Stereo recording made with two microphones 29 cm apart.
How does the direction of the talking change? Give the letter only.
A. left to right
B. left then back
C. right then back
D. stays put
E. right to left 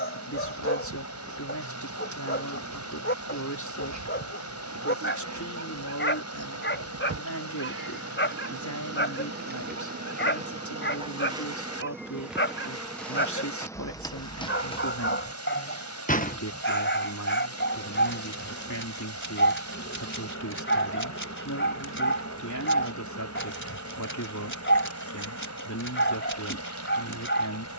D.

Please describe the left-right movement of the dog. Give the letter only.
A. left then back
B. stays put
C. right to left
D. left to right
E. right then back
B.